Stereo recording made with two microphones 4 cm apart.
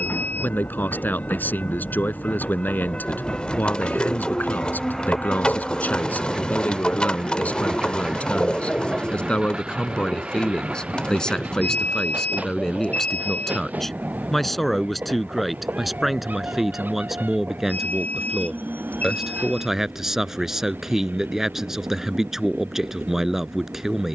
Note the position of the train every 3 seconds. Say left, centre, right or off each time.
left, centre, centre, right, right, right, right, right.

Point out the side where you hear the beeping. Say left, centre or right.
left.